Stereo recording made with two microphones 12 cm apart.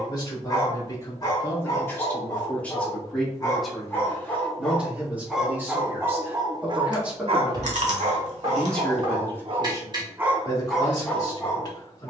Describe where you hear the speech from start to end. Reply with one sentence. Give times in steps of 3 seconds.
In this clip you hear the speech on the left from 0 s, in the centre from 3 s and on the left from 9 s.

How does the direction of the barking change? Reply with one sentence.
You can hear the barking move from left to right and back again.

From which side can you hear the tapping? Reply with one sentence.
You can hear the tapping on the right.